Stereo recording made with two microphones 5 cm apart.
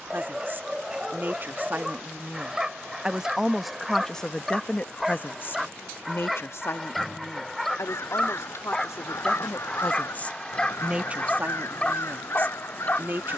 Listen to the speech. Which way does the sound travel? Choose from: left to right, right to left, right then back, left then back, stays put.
left then back.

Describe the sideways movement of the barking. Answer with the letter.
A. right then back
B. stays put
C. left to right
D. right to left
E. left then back
D.